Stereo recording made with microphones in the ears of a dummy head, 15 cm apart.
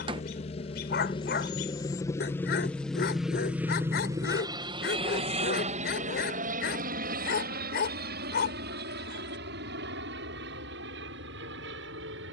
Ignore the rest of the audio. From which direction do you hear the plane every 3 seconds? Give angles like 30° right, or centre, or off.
30° left, 20° right, 50° right, 70° right.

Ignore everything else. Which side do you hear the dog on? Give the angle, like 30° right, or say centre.
60° left.